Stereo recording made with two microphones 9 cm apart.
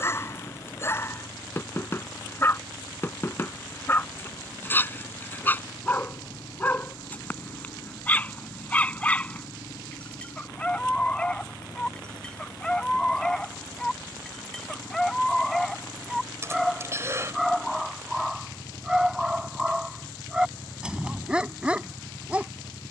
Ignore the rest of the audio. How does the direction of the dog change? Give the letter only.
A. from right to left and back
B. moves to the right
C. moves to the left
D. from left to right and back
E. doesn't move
B.